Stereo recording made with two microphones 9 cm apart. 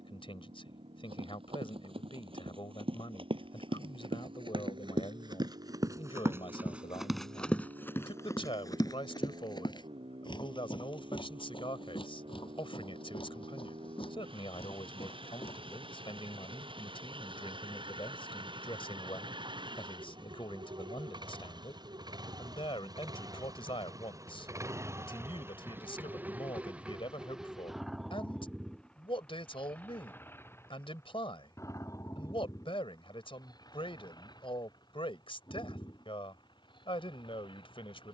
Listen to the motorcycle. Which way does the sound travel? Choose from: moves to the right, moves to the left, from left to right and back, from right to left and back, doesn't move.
moves to the left.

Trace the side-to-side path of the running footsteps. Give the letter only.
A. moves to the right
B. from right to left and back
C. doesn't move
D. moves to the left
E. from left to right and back
D.